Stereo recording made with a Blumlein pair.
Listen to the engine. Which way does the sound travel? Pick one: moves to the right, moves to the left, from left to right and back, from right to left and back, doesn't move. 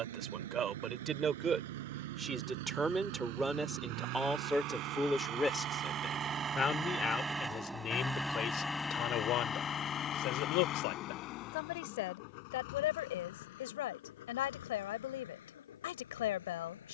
moves to the left.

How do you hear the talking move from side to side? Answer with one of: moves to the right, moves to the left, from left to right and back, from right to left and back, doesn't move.
moves to the left.